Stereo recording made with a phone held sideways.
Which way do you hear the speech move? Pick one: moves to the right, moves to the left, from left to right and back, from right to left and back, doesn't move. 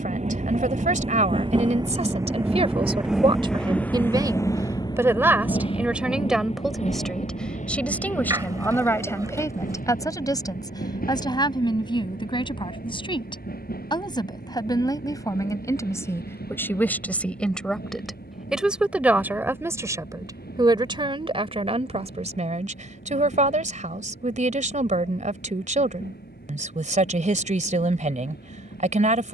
from right to left and back.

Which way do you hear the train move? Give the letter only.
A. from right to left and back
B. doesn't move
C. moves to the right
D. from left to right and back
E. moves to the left
E.